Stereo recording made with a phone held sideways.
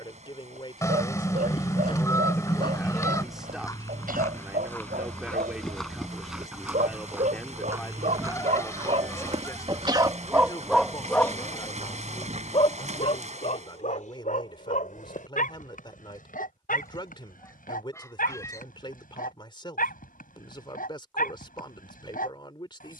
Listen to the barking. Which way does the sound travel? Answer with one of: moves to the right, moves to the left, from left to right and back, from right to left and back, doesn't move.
moves to the left.